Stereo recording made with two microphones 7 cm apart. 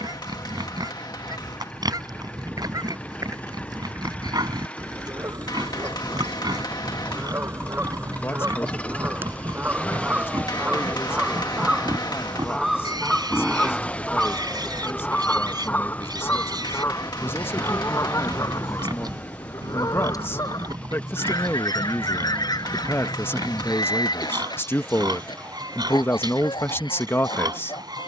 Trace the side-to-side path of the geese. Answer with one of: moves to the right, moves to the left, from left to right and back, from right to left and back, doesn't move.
moves to the left.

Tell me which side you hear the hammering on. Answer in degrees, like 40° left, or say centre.
60° left.